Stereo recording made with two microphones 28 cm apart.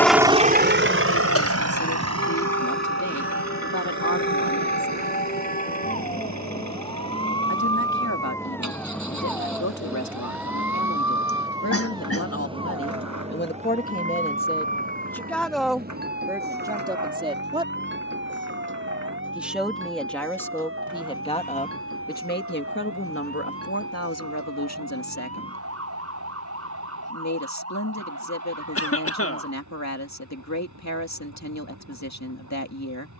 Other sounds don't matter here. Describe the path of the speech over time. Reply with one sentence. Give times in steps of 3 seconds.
In this clip you hear the speech on the left from 0 s, in the centre from 15 s and on the left from 21 s.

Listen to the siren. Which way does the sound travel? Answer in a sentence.
In this clip you hear the siren move to the right.